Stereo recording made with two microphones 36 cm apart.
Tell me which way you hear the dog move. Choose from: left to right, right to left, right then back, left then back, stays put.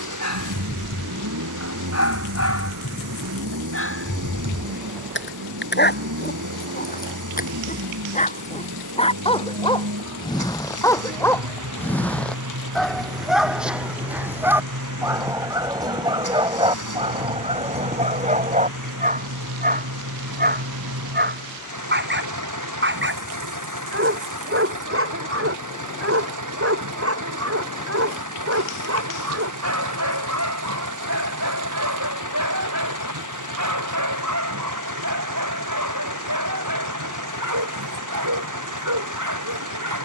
left to right.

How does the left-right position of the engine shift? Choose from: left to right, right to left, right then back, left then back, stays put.
stays put.